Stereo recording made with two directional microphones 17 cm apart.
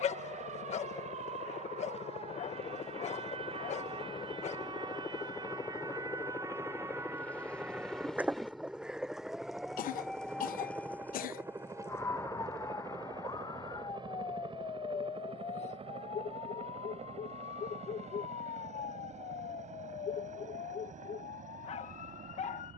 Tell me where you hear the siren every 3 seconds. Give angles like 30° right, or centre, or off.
40° right, 30° right, 10° right, 10° left, 20° left, 40° left, 50° left, 60° left.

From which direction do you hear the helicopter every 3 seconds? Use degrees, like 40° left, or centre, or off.
40° left, 30° left, 10° left, 10° right, 30° right, 40° right, 40° right, 50° right.